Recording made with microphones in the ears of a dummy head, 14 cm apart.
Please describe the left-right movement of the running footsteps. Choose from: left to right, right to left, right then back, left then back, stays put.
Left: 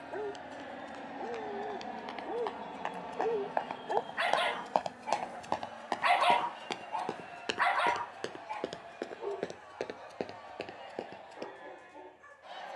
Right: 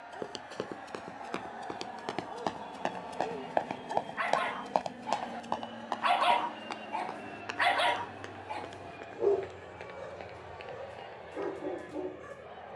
right to left.